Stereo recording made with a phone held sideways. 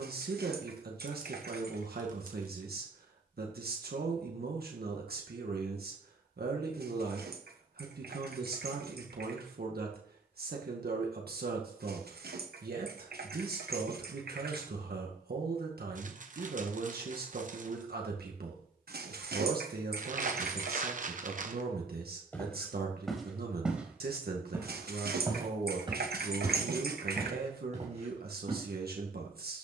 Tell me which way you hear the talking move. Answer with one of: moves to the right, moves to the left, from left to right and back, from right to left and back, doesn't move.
doesn't move.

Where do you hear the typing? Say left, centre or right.
right.